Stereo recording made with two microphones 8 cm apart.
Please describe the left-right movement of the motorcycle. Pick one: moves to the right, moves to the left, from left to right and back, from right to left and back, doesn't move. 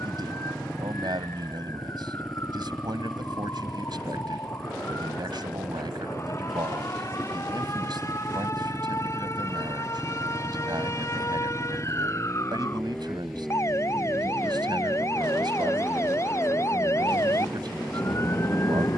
doesn't move.